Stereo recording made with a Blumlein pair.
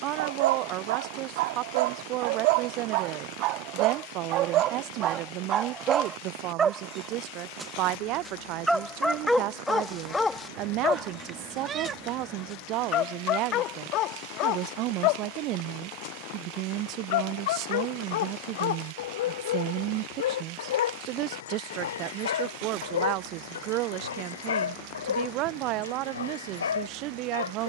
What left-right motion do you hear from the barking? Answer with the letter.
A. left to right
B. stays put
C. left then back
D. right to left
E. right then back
D.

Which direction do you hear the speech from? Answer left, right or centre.
right.